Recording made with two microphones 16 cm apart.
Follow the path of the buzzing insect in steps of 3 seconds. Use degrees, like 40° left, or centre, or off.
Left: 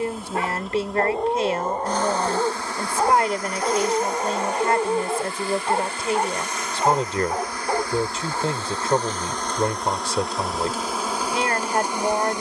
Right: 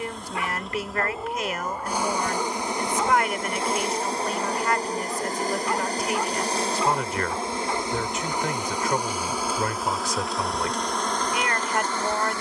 10° right, 30° right, 20° right, centre.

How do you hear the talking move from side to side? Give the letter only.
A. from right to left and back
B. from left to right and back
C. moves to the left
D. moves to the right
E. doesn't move
E.